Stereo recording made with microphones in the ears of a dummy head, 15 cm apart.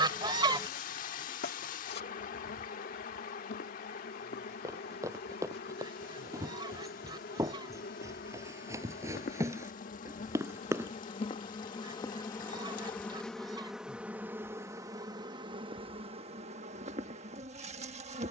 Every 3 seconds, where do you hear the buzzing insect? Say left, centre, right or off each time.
left, left, left, left, centre, right.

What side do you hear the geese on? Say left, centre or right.
right.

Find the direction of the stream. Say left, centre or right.
left.